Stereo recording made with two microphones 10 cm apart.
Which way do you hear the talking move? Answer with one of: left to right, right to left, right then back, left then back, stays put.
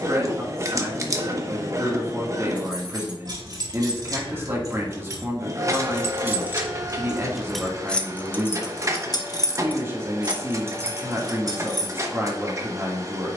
stays put.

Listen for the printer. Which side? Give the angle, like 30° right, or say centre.
30° right.